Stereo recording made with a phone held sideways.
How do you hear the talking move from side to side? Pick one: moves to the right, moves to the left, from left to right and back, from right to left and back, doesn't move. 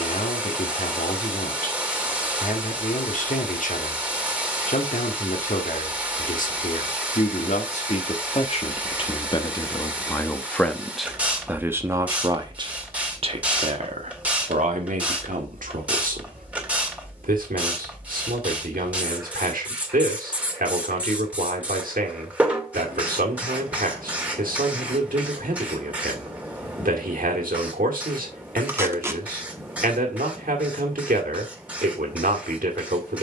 moves to the right.